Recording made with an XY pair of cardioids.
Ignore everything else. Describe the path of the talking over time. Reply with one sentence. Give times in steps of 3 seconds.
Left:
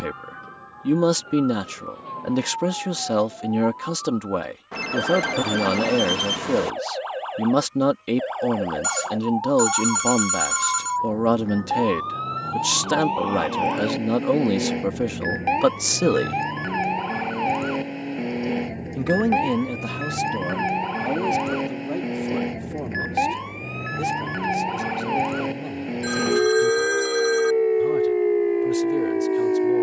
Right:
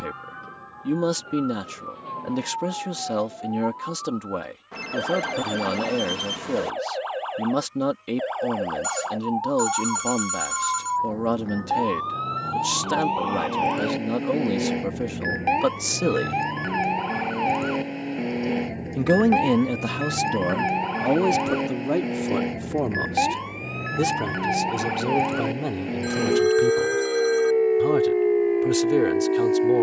In this clip you hear the talking on the left from 0 s and on the right from 18 s.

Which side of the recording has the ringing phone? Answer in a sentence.
You can hear the ringing phone on the left.